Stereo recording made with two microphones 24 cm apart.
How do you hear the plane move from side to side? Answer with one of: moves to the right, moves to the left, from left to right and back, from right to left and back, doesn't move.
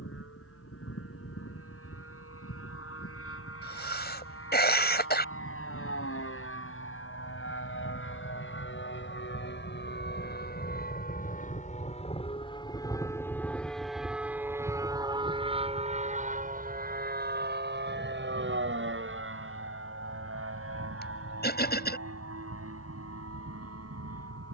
moves to the right.